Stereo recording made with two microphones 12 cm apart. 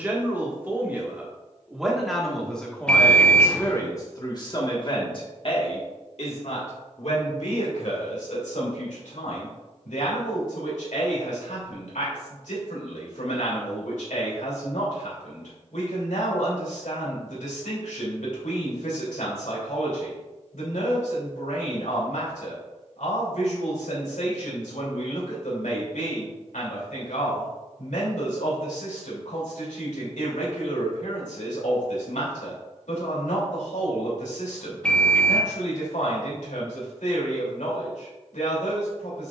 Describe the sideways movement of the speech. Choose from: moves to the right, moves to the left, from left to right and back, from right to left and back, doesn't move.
moves to the left.